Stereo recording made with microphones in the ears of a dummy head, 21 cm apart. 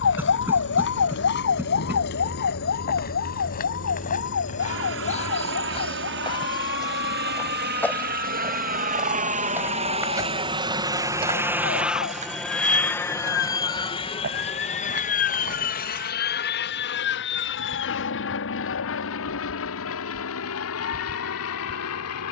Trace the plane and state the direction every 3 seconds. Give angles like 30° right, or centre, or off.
70° right, 60° right, 50° right, 20° right, 20° left, 40° left, 60° left, 60° left.